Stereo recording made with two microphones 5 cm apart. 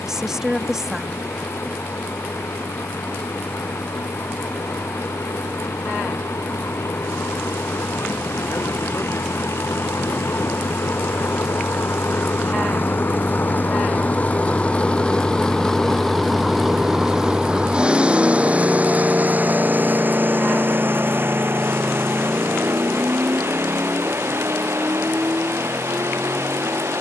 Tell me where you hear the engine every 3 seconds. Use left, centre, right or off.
left, left, left, left, left, centre, right, right, right.